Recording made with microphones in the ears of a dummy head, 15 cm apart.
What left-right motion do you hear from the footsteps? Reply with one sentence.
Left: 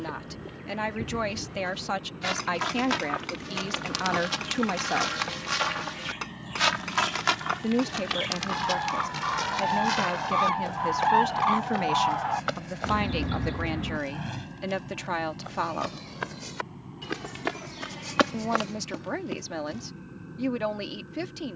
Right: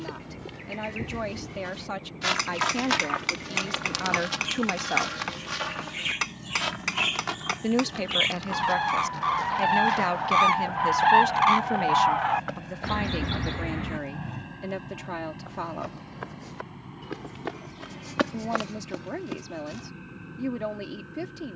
In this clip you hear the footsteps move from right to left and back again.